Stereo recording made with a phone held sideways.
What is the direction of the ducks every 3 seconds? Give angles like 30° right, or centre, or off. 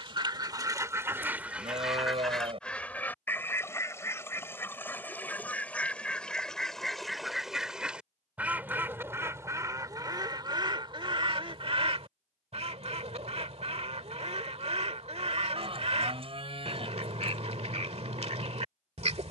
10° right, 10° left, centre, 30° right, 50° right, 50° right, 50° right.